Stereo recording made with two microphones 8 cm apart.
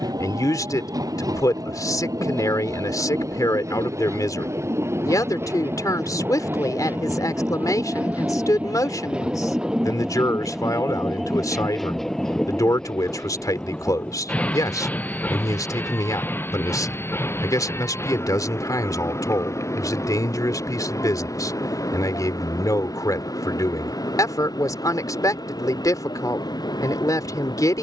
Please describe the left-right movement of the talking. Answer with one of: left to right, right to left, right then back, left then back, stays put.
stays put.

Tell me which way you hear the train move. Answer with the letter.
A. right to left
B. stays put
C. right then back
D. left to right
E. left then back
A.